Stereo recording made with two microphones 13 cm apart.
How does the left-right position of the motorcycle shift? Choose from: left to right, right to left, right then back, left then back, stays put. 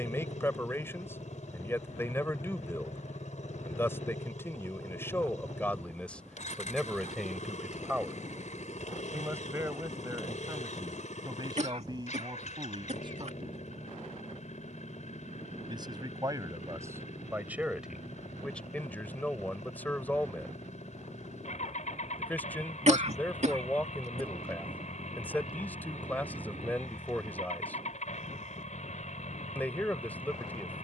stays put.